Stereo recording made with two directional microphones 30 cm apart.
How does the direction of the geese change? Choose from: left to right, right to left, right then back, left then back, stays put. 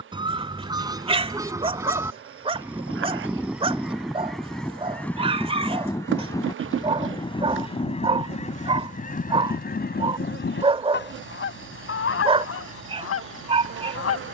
right to left.